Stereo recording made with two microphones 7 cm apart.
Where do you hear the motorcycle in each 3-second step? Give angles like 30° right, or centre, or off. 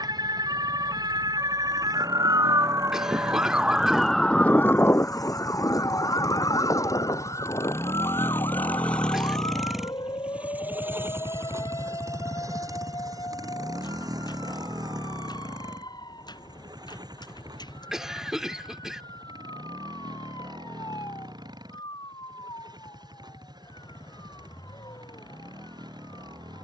70° left, 70° left, 40° left, 20° right, 60° right, 70° right, 80° right, 80° right, 80° right.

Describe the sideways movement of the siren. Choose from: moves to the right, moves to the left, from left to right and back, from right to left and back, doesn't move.
moves to the left.